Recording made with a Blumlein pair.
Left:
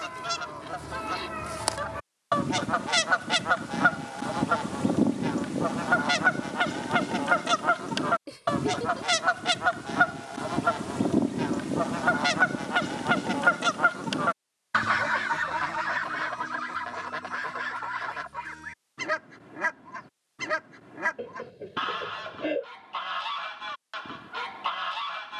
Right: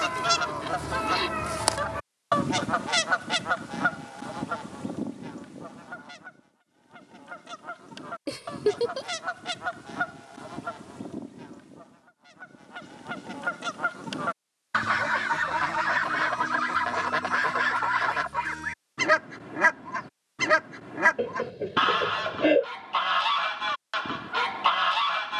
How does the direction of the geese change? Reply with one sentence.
You can hear the geese go left and come back.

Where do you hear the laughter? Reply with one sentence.
In this clip you hear the laughter on the right.